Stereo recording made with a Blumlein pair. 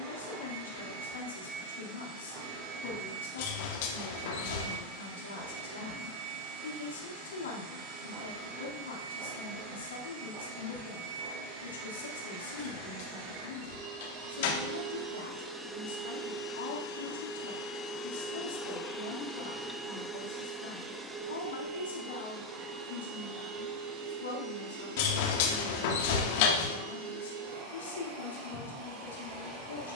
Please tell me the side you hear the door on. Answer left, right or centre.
left.